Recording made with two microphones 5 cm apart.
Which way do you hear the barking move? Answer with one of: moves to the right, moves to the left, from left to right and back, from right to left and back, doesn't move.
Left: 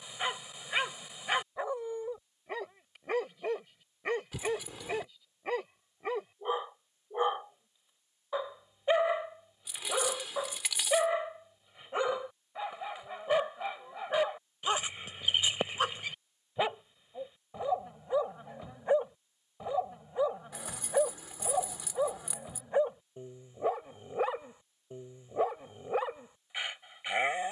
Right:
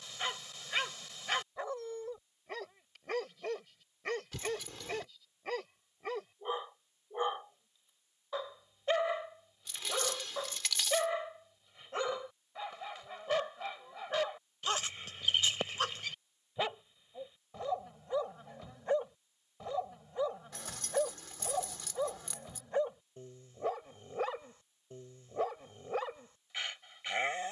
doesn't move.